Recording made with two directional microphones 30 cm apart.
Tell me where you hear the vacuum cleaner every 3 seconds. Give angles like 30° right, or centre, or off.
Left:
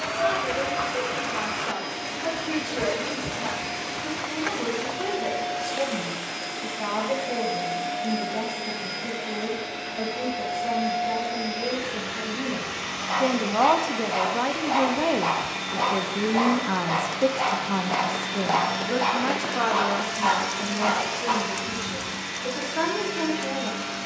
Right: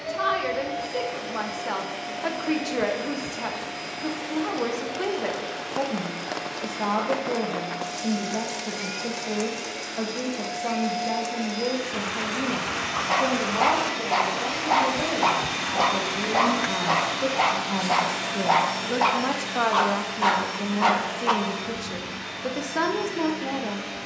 40° left, 40° left, 30° left, 10° left, 10° right, 30° right, 10° left, 40° left.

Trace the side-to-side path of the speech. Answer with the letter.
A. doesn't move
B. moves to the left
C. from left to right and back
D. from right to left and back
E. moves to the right
D.